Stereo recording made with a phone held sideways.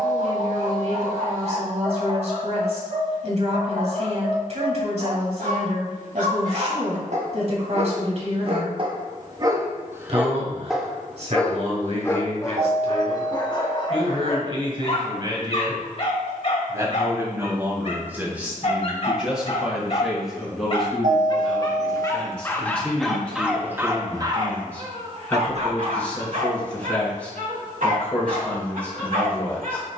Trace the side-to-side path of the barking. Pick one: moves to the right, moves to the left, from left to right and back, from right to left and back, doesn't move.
from right to left and back.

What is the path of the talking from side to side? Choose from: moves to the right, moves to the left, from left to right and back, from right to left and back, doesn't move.
moves to the left.